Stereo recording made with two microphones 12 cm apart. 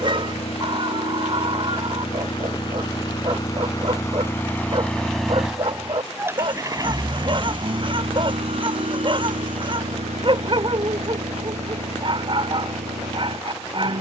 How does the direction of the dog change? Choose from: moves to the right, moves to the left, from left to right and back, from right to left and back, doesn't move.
doesn't move.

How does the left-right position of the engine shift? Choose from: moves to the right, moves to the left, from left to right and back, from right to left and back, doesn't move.
moves to the right.